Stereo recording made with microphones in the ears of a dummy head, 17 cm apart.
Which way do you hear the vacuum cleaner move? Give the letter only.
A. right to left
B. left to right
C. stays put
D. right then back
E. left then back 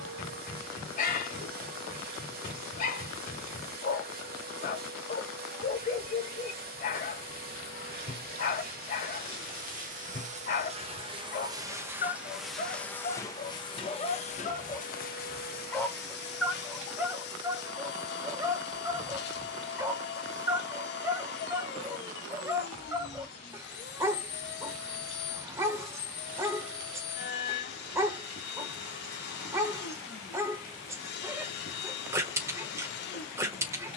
A.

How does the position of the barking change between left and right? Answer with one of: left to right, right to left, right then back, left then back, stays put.
left to right.